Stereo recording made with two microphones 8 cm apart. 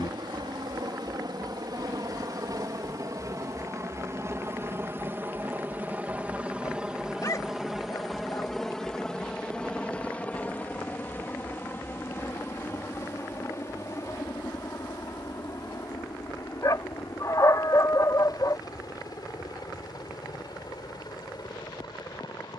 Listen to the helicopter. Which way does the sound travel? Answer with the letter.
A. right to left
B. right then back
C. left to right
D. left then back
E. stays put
A.